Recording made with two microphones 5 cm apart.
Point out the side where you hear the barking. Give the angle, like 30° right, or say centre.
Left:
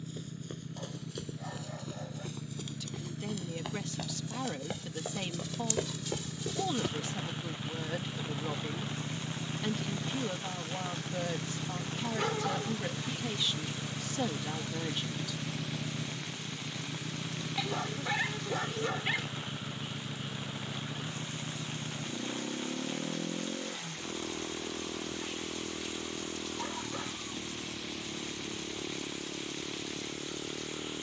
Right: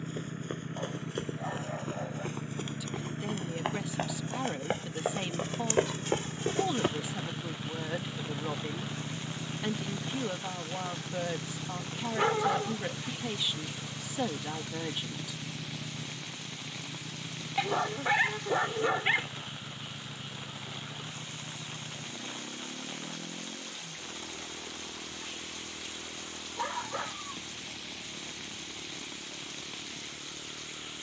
30° right.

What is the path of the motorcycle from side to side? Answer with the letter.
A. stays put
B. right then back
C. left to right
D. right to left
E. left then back
D.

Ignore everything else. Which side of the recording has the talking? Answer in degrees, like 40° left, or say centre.
10° right.